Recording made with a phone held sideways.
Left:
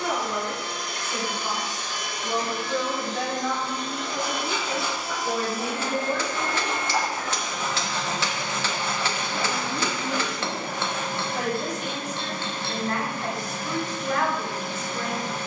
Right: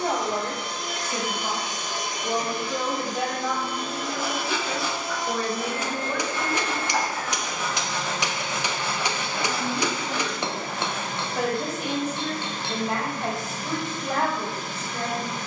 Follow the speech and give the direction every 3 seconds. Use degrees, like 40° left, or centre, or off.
30° right, 10° left, 30° left, centre, 30° right.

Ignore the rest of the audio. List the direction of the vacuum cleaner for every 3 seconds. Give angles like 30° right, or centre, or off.
20° right, centre, 30° left, 50° left, 50° left.